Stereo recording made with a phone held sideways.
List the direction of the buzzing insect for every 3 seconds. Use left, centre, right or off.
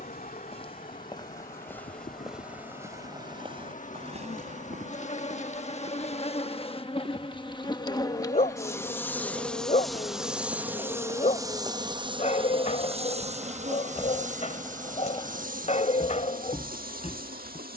left, left, left, centre, right, right.